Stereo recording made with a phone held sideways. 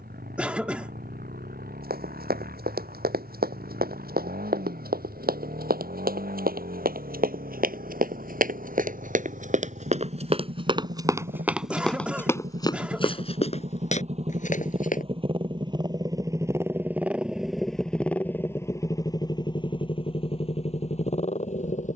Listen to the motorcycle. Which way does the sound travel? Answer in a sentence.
You can hear the motorcycle go from the right side to the left.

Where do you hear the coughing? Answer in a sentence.
You can hear the coughing in the centre.